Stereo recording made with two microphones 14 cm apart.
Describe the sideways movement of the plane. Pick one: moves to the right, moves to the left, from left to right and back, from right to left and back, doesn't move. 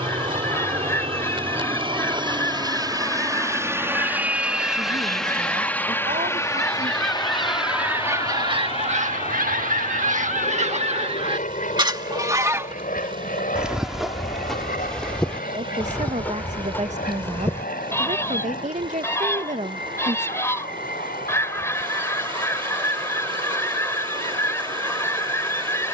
moves to the left.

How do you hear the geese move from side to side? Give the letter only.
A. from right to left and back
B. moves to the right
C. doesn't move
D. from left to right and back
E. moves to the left
D.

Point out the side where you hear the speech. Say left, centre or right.
right.